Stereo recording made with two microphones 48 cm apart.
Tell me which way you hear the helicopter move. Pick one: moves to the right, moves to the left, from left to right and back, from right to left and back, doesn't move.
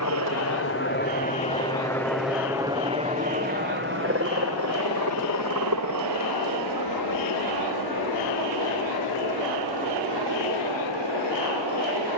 moves to the right.